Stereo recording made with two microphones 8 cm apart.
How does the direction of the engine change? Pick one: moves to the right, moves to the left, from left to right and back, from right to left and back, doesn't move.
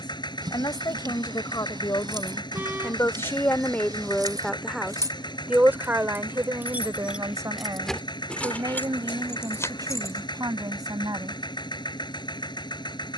doesn't move.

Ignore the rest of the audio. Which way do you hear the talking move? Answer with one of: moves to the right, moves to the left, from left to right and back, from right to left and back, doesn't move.
moves to the right.